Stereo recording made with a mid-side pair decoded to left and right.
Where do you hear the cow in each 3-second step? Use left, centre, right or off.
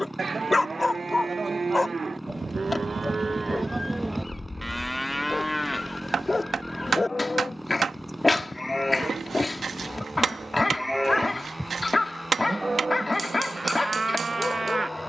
right, centre, left, centre, right.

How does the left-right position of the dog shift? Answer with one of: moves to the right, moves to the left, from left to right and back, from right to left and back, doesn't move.
doesn't move.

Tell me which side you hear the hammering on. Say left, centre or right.
right.